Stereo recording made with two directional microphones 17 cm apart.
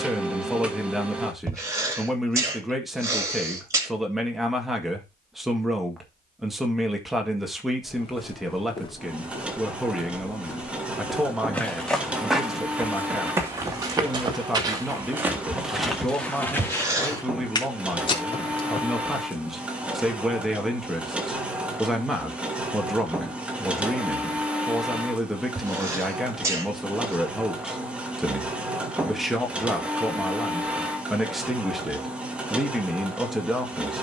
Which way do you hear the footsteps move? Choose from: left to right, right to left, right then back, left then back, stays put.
right then back.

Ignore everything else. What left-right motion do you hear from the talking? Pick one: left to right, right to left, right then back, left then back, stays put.
stays put.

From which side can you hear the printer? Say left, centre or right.
centre.